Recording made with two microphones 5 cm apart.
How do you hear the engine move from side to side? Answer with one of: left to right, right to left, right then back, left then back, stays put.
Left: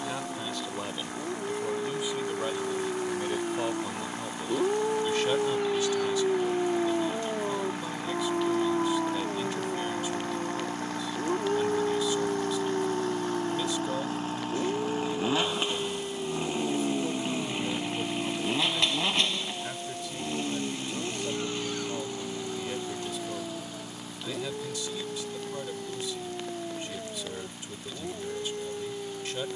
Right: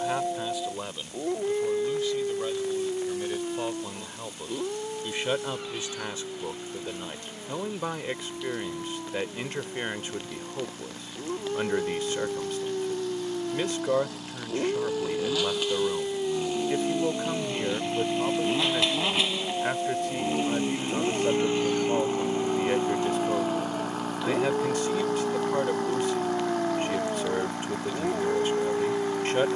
left to right.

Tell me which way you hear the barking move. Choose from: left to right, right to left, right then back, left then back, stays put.
left then back.